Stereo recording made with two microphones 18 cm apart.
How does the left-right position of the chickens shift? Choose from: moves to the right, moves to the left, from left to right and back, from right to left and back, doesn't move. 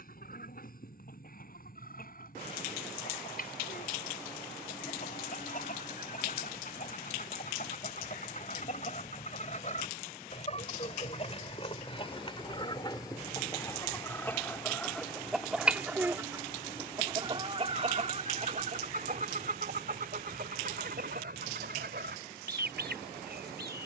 moves to the right.